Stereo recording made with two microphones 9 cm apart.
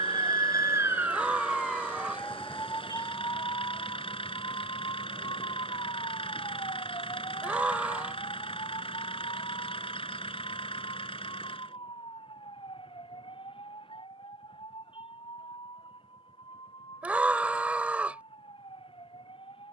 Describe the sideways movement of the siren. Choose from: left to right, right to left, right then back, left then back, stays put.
right to left.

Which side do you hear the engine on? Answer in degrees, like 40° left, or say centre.
80° left.